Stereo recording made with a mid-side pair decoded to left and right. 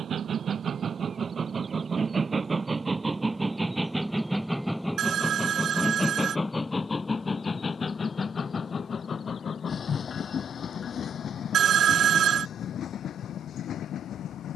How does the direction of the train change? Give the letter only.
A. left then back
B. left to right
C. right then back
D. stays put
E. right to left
E.